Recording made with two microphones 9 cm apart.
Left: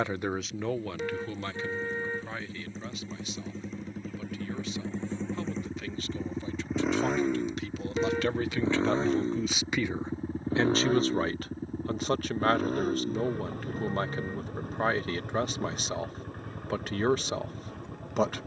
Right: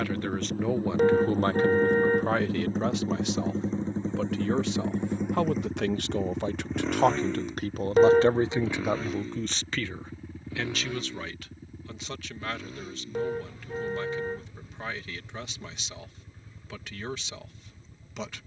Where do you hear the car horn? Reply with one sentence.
You can hear the car horn on the right.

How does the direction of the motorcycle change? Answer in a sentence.
You can hear the motorcycle go from the right side to the left.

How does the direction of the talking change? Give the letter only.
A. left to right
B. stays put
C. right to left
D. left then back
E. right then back
E.